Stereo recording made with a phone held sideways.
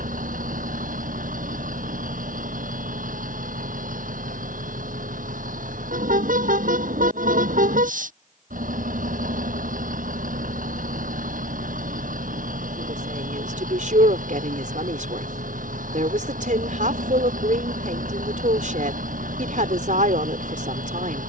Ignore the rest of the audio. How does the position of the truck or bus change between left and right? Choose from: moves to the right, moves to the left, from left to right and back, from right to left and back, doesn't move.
doesn't move.